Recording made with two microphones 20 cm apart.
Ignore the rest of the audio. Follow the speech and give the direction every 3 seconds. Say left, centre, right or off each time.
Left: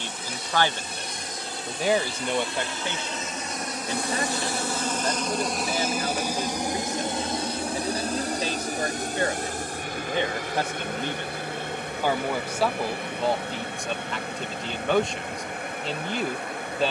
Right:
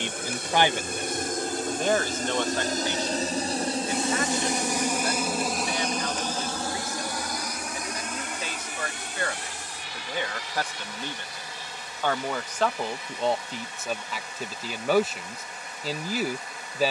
centre, left, left, left, centre, centre.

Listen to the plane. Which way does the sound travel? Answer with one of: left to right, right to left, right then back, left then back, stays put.
right to left.